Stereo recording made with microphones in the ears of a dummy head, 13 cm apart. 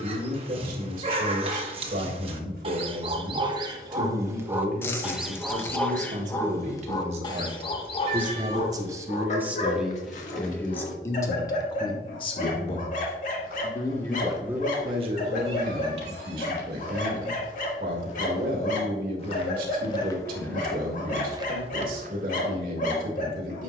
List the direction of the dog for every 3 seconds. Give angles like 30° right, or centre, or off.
40° right, 20° right, 30° left, 50° left, 60° left, 60° left, 60° left, 60° left.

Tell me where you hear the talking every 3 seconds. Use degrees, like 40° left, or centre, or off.
60° right, 60° right, 40° right, 10° left, 20° left, 60° right, 60° right, 60° right.